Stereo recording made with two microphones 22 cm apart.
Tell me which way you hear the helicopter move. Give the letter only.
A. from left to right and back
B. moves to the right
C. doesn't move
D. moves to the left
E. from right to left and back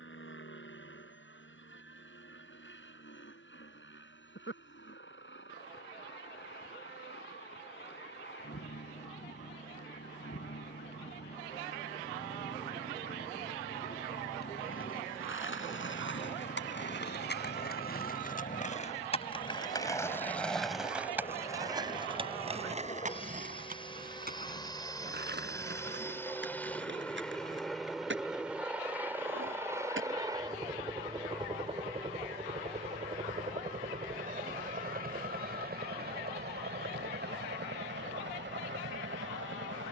B.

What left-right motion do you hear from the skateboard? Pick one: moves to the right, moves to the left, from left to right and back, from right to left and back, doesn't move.
moves to the right.